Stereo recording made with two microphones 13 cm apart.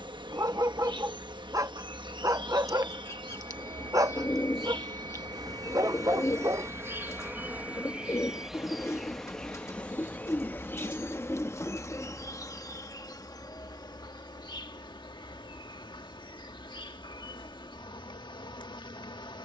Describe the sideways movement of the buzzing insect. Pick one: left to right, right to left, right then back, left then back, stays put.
right to left.